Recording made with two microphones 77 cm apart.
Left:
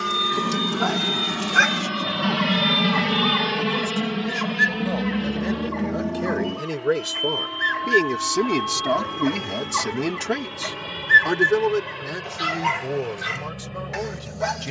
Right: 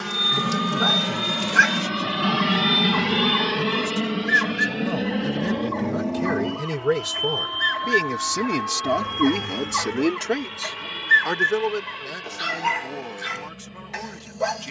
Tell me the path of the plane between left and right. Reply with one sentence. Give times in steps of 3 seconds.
You can hear the plane in the centre from 0 s and on the left from 3 s.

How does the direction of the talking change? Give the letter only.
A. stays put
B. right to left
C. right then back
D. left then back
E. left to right
B.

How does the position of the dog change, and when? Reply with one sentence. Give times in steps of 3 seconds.
You can hear the dog on the left from 0 s, on the right from 3 s, in the centre from 9 s and on the left from 12 s.